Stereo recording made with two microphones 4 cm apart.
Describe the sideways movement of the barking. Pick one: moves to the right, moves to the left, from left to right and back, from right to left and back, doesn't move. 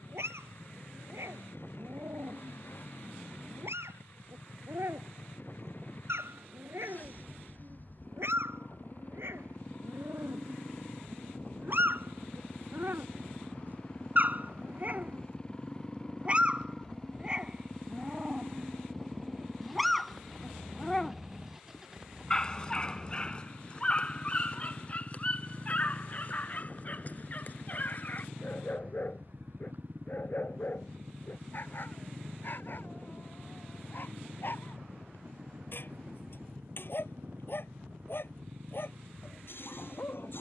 moves to the left.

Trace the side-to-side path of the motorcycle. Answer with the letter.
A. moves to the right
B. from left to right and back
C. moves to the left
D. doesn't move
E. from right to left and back
A.